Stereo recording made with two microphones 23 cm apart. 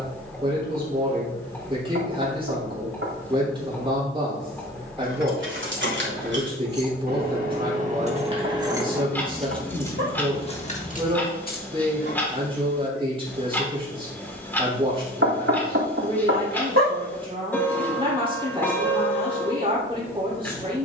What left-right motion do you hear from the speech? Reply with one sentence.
In this clip you hear the speech stay put.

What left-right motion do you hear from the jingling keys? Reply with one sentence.
In this clip you hear the jingling keys move to the left.